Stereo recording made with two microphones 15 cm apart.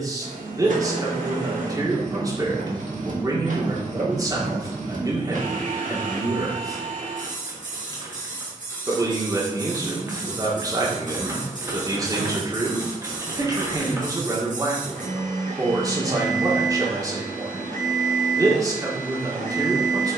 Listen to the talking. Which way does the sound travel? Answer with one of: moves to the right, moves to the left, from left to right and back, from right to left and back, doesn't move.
doesn't move.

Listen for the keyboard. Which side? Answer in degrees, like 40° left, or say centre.
20° right.